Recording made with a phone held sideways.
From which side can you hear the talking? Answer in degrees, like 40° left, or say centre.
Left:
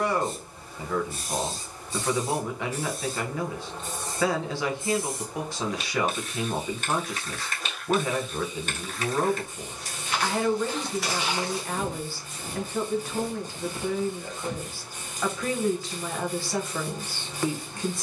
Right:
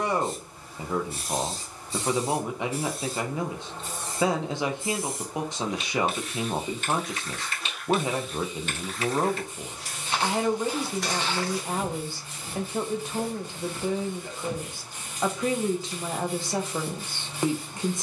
20° right.